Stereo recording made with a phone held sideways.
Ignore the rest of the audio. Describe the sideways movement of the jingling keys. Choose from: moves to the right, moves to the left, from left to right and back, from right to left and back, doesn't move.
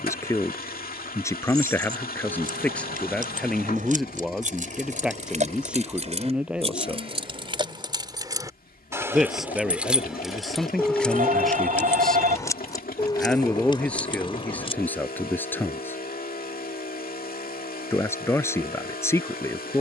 moves to the left.